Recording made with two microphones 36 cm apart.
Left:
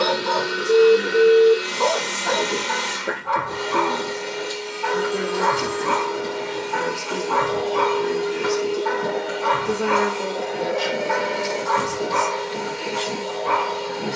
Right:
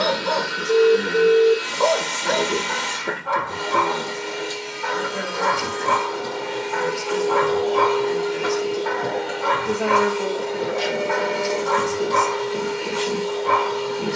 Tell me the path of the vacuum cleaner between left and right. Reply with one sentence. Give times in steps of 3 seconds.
In this clip you hear the vacuum cleaner on the left from 0 s and in the centre from 9 s.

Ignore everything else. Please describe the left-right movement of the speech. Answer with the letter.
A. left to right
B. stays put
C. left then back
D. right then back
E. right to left
C.